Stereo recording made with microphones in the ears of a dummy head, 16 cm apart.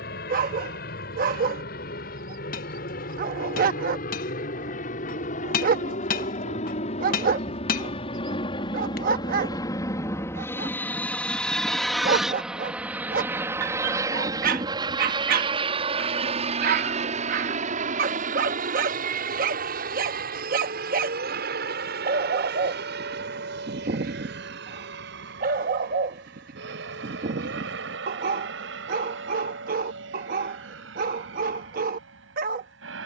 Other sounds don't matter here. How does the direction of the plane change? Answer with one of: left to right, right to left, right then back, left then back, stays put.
left to right.